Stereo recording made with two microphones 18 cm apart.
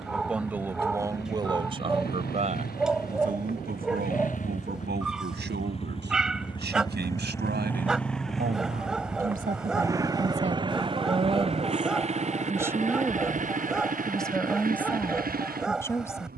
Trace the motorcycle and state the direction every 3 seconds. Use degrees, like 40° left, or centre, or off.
60° left, 50° left, 10° left, 20° right, 50° right, 50° right.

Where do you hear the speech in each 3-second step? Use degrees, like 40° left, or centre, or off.
20° right, 70° right, 70° right, 40° right, centre, 10° left.